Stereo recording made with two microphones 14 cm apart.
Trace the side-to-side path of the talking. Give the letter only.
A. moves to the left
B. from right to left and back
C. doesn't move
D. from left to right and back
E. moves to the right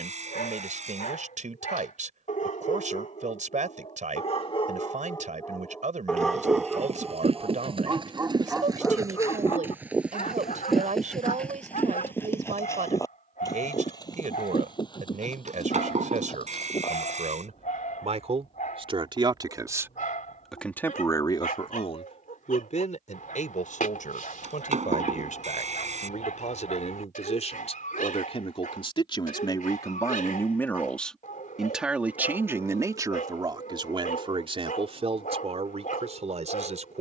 B.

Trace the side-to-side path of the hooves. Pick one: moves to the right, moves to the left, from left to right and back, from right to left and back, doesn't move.
moves to the left.